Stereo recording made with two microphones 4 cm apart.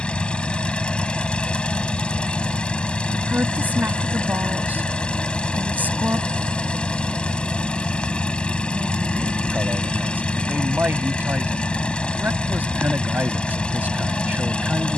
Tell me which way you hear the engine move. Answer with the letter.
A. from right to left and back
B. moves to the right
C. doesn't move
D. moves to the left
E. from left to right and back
C.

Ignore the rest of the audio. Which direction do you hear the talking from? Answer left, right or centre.
right.